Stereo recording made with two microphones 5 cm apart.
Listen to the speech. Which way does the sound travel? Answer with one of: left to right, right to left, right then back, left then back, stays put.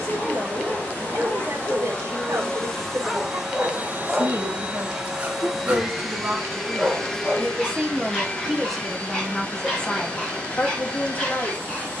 right to left.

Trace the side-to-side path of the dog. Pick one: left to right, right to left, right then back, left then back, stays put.
right then back.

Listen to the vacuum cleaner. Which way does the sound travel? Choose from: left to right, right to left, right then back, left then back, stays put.
right then back.